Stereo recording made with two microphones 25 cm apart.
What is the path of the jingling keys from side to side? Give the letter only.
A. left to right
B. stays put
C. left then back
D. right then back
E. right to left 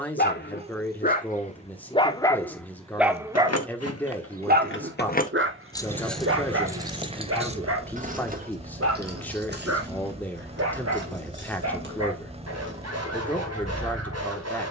A.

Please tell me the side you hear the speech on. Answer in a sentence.
You can hear the speech in the centre.